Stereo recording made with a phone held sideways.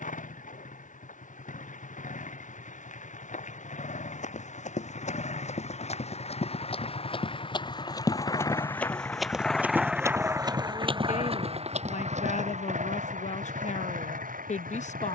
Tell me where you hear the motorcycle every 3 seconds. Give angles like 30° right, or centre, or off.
70° left, 60° left, 40° left, 20° right, 60° right.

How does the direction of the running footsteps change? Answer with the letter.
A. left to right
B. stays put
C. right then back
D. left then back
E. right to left
A.